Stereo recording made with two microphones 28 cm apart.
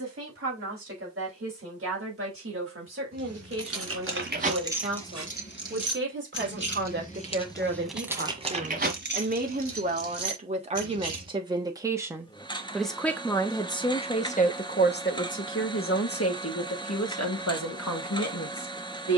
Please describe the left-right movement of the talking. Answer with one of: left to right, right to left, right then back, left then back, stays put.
right to left.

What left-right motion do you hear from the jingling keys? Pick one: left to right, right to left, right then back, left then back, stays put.
left then back.